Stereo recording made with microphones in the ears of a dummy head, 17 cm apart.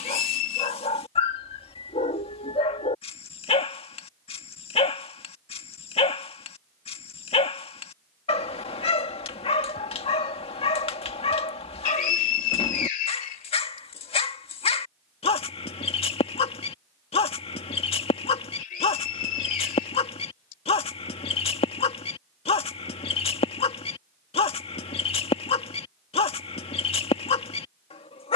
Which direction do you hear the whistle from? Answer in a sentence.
You can hear the whistle on the left.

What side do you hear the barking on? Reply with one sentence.
You can hear the barking on the left.